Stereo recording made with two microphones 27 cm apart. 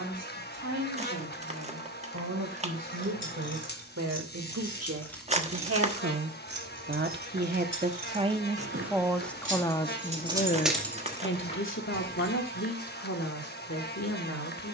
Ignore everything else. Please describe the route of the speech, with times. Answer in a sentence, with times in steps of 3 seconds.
In this clip you hear the speech on the right from 0 s and on the left from 9 s.